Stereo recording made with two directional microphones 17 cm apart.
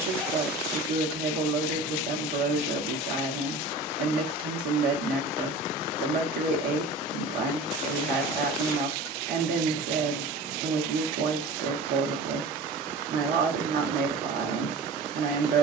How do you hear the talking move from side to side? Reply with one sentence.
In this clip you hear the talking stay put.